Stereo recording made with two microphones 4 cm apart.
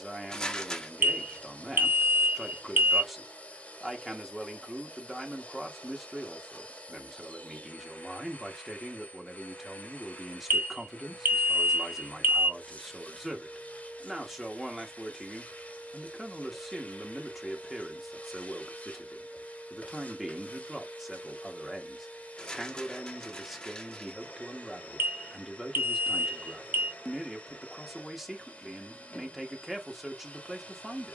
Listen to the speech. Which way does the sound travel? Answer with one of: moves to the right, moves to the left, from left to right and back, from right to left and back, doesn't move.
doesn't move.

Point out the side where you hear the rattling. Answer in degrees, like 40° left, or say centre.
20° left.